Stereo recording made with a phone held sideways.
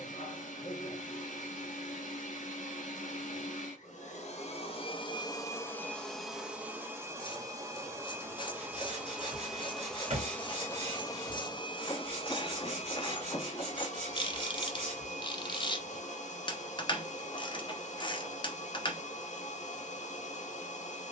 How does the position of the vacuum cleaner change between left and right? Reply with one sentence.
In this clip you hear the vacuum cleaner move from left to right and back again.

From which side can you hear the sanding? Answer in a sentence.
You can hear the sanding on the right.